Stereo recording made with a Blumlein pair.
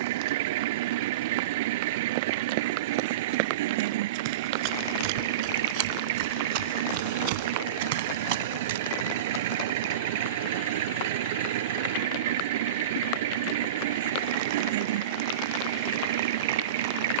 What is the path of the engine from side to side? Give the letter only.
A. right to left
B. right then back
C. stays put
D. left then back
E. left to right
C.